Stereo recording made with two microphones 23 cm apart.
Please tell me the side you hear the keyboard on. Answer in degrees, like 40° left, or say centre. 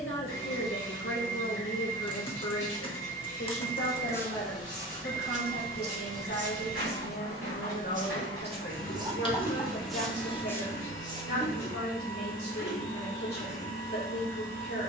20° left.